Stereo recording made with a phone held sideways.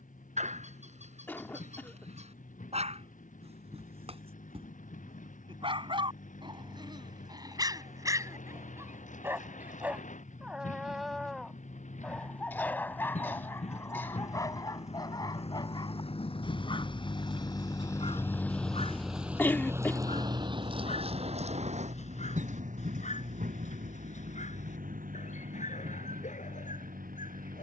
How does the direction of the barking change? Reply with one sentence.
In this clip you hear the barking move from right to left.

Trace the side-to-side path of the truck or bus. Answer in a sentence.
You can hear the truck or bus move from left to right.